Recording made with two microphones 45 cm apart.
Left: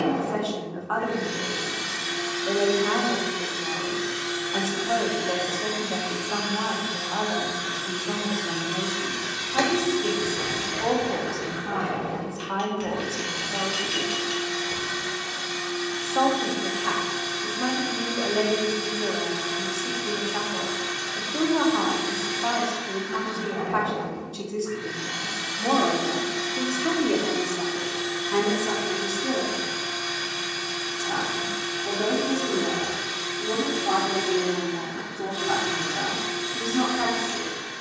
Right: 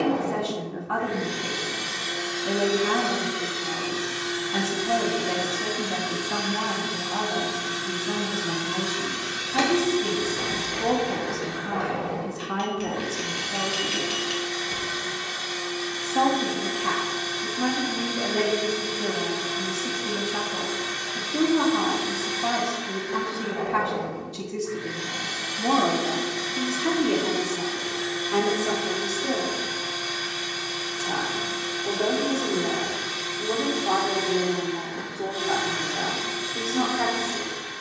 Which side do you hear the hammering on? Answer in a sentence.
You can hear the hammering in the centre.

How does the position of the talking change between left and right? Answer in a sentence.
You can hear the talking travel towards the left.